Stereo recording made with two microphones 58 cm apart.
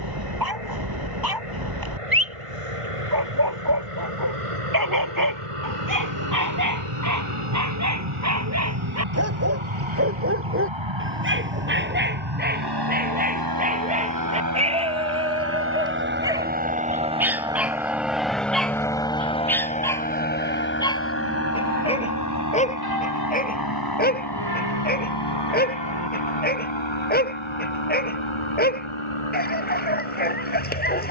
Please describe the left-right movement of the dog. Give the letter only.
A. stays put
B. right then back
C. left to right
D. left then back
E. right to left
E.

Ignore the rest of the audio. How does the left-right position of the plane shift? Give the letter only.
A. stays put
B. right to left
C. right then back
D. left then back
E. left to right
B.